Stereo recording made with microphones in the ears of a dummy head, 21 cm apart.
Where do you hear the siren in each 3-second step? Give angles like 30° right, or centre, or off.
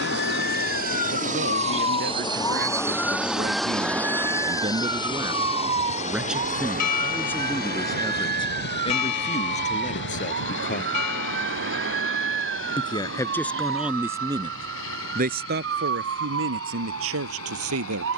30° left, 10° right, 40° right, 50° right, 50° right, 60° right.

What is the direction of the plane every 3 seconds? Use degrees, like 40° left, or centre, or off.
30° right, 10° left, 40° left, 50° left, 60° left, 60° left.